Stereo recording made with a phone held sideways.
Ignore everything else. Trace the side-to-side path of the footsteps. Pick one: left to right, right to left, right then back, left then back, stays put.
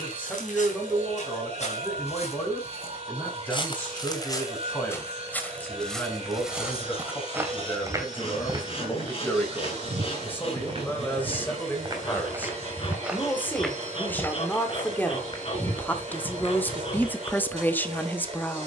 right then back.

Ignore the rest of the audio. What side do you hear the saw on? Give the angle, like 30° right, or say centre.
40° left.